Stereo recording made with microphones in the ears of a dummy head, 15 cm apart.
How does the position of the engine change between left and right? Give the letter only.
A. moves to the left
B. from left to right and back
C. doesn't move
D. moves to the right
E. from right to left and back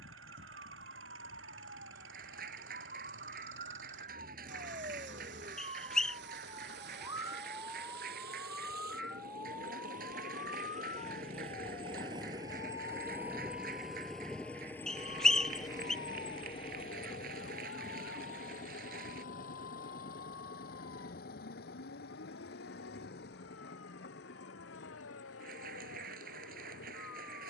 A.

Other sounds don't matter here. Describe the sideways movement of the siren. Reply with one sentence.
In this clip you hear the siren move to the left.